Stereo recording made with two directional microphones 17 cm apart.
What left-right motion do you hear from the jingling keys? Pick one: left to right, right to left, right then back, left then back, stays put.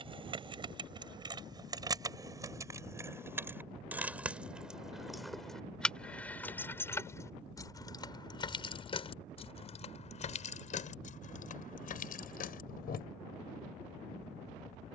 right to left.